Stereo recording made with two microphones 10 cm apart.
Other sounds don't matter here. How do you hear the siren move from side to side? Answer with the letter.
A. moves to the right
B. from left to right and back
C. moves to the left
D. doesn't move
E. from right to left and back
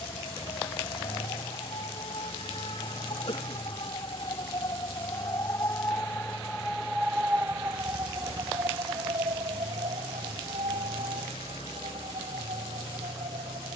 A.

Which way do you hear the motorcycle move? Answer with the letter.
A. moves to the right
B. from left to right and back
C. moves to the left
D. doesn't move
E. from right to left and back
D.